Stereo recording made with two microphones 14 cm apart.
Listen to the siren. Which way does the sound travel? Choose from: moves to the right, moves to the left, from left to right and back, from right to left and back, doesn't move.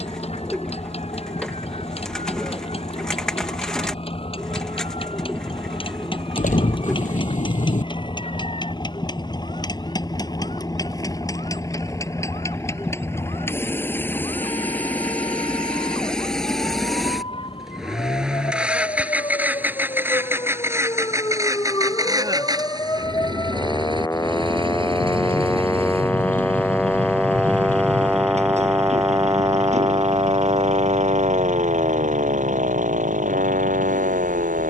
moves to the right.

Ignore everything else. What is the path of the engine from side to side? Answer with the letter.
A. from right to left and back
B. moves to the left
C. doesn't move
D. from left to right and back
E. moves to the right
E.